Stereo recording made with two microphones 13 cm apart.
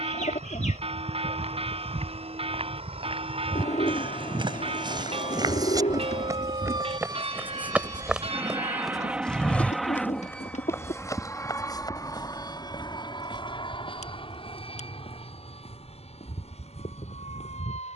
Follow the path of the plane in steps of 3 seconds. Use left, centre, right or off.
right, right, right, centre, left, left.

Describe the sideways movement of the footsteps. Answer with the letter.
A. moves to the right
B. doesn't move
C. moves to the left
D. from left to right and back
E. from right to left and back
C.